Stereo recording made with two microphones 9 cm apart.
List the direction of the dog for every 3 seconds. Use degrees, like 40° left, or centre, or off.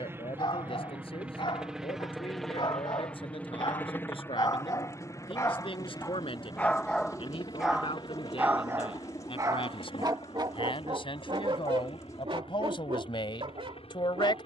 60° left, 40° left, centre, 50° right, 70° right.